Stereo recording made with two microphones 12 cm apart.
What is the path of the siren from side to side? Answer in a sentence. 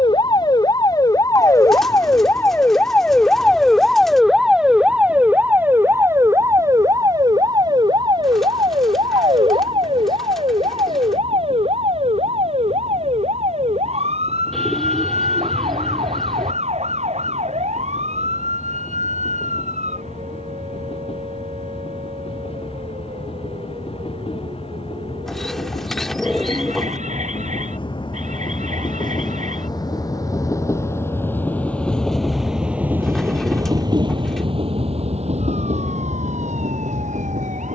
You can hear the siren move from left to right.